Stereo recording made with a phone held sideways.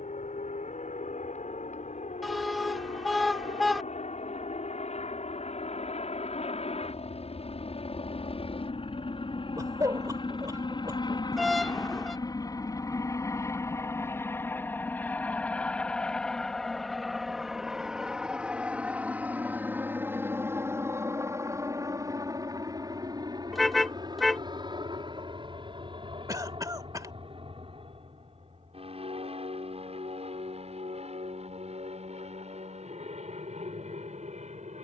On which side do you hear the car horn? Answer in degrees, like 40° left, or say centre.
centre.